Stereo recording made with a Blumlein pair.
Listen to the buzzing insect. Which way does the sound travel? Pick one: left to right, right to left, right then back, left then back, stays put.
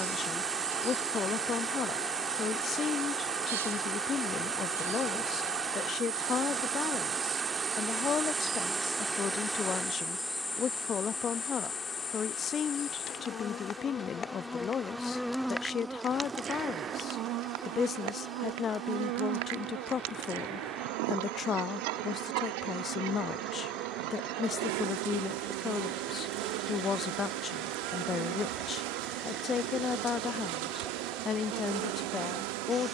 left then back.